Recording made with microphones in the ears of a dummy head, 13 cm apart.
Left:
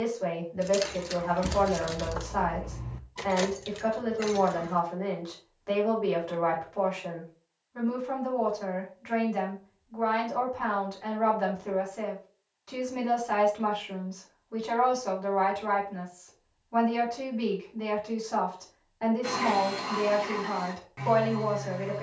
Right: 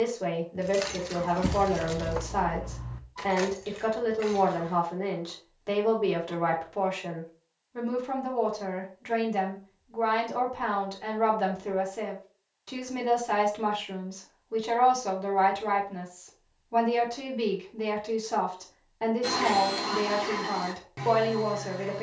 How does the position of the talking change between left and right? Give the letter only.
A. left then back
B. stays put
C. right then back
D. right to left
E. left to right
B.